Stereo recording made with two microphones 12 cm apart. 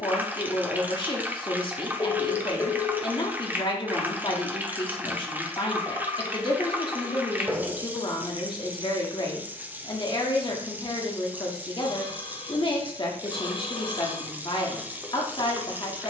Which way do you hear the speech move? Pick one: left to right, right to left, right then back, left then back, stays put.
stays put.